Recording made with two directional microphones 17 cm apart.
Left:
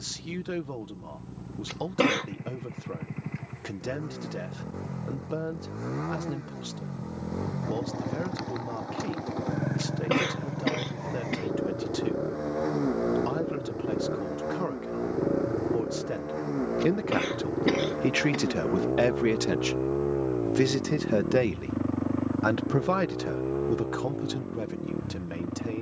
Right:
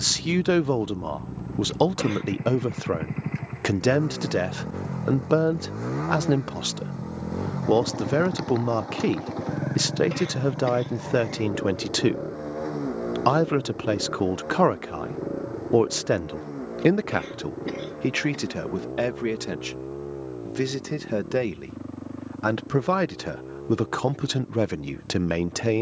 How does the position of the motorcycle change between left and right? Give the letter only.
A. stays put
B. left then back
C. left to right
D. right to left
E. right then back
D.